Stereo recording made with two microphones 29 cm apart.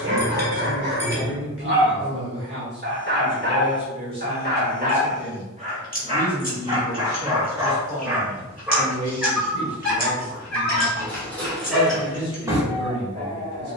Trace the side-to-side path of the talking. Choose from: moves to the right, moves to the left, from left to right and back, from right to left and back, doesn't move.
from right to left and back.